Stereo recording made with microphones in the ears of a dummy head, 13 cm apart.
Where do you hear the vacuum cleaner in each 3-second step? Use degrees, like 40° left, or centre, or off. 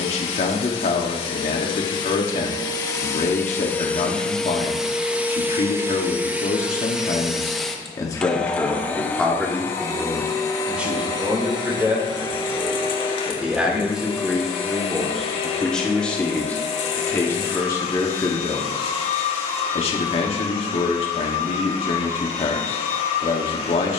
40° left, centre, centre, 20° left, 40° left, 40° left, 40° left, 40° left.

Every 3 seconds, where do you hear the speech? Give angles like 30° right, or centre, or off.
50° left, 50° left, 40° left, 10° right, 10° right, 10° left, 40° left, 40° left.